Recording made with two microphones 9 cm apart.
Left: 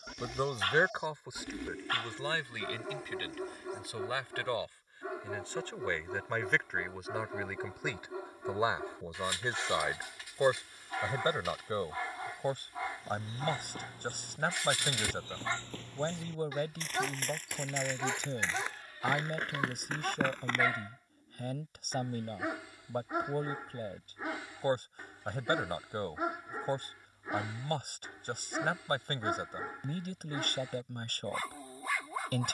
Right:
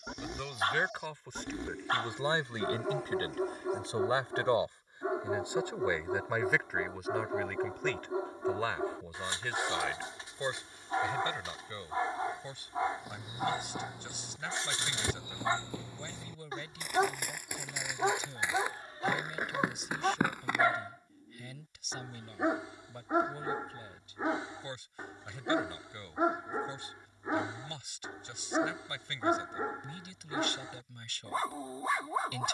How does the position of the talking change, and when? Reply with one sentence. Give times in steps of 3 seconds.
You can hear the talking in the centre from 0 s, on the right from 3 s, in the centre from 6 s and on the left from 9 s.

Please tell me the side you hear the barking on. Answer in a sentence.
You can hear the barking on the right.